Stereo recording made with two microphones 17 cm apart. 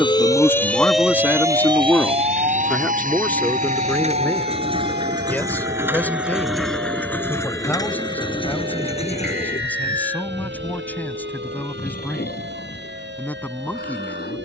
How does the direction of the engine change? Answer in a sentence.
You can hear the engine go from the right side to the left.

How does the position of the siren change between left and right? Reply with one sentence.
In this clip you hear the siren go from the left side to the right.